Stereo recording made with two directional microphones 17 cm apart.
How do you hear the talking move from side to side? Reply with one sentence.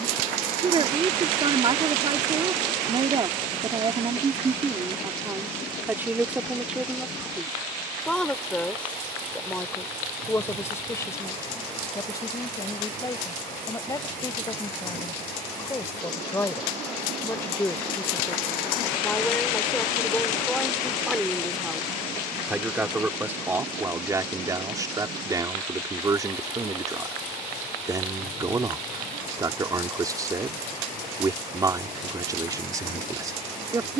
In this clip you hear the talking move from right to left and back again.